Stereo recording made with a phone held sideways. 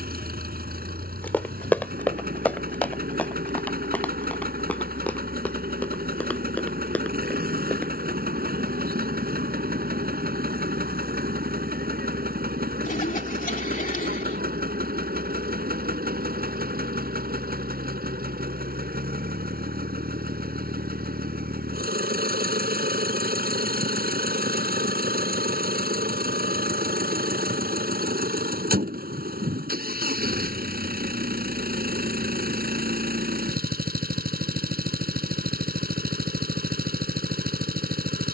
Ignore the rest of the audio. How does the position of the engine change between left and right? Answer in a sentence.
You can hear the engine stay in one place.